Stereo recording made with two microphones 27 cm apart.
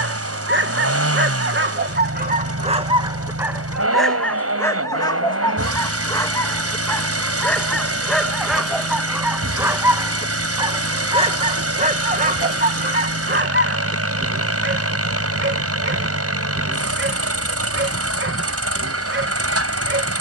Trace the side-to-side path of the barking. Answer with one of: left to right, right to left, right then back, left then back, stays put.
left then back.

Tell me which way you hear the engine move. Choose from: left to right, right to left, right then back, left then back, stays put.
stays put.